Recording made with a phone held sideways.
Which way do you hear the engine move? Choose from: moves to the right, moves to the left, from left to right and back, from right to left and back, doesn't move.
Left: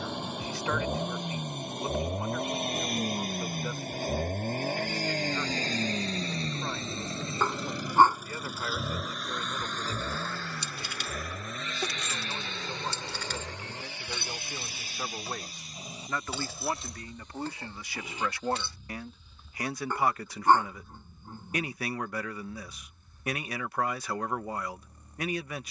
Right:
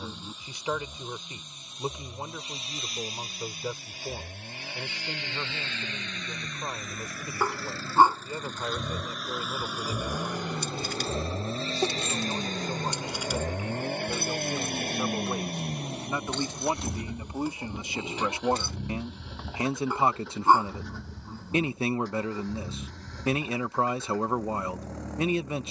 moves to the right.